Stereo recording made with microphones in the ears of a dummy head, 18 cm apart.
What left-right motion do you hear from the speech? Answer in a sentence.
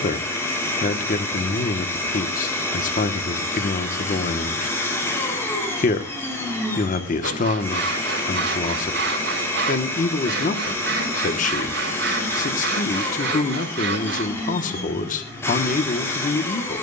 In this clip you hear the speech stay in one place.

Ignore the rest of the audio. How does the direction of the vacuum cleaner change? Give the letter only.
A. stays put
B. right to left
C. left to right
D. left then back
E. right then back
A.